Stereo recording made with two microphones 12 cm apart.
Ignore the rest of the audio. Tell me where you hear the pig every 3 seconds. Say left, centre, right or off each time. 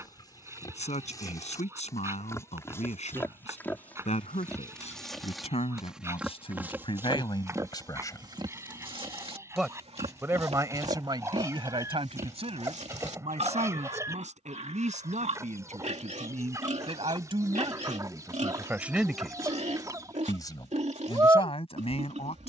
left, centre, right, right, right, right, right, right.